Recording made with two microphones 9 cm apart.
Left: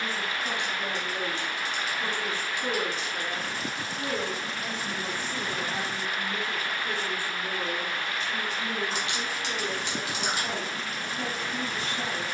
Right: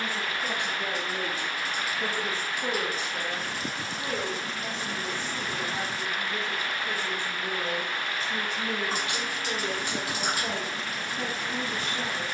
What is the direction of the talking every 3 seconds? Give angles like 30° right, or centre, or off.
50° right, centre, 20° right, 50° right.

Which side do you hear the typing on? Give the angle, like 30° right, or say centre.
40° right.